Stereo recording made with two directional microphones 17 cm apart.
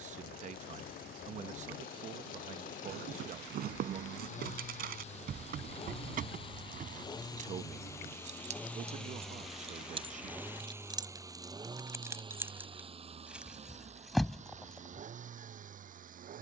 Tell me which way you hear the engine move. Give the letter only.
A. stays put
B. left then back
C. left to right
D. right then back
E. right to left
C.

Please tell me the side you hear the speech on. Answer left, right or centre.
right.